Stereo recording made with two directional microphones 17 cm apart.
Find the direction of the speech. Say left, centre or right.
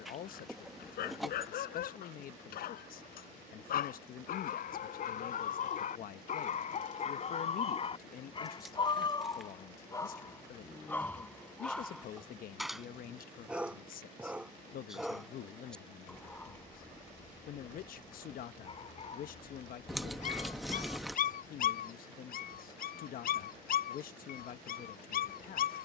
left.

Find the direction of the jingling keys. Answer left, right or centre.
centre.